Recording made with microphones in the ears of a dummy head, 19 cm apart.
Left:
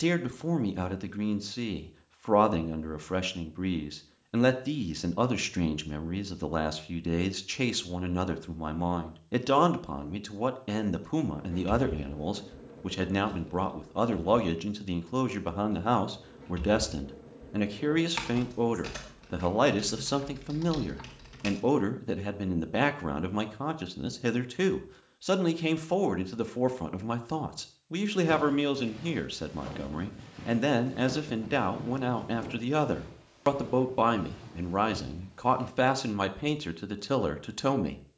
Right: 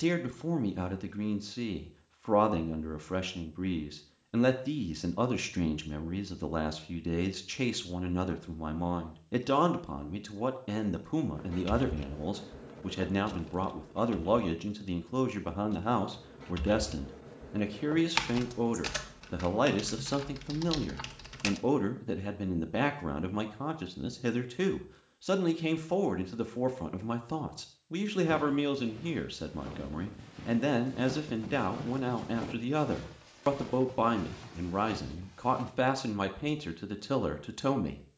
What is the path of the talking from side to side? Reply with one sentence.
In this clip you hear the talking stay in one place.